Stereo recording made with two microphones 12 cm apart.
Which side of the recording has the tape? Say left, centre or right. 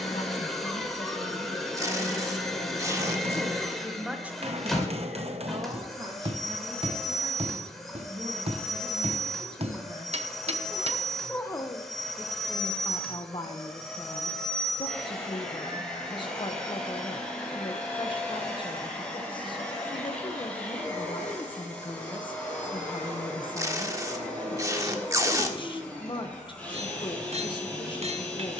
right.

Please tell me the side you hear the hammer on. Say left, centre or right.
right.